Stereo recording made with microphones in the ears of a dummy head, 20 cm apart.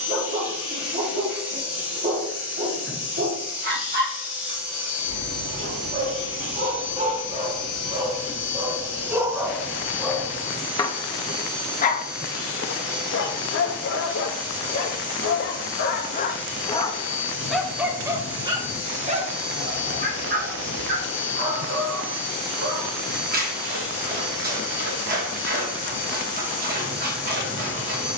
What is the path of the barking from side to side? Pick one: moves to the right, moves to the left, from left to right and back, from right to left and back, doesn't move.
from right to left and back.